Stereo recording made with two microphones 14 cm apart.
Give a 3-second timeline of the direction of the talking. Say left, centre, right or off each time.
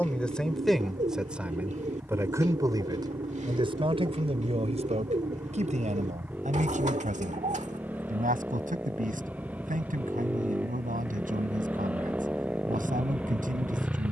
centre, right, right, right, right.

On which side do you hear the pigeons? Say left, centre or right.
right.